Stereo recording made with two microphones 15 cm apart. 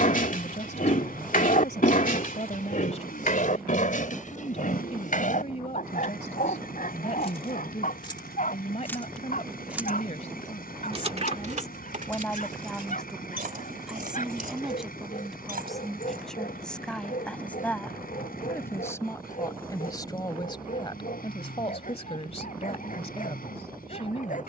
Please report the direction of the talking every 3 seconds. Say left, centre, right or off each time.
left, left, left, left, centre, centre, left, left.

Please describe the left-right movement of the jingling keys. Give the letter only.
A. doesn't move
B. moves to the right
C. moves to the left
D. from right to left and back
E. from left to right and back
B.